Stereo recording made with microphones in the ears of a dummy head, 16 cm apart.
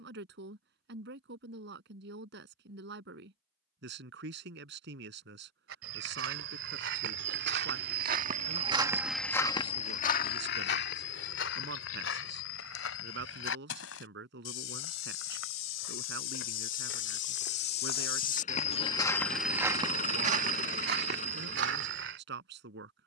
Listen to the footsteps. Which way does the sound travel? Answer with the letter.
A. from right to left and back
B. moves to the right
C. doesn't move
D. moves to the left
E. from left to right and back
A.